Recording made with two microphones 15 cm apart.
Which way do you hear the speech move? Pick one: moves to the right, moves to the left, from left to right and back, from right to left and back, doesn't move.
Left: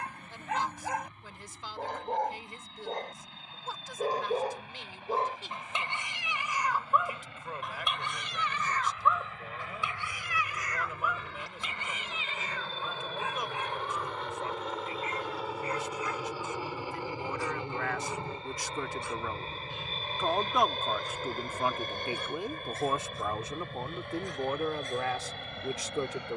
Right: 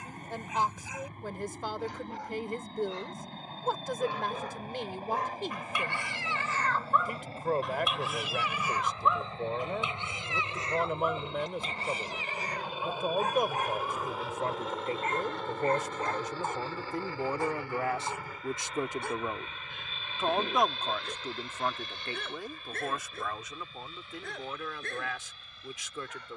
moves to the left.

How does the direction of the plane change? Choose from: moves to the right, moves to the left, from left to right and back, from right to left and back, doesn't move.
moves to the left.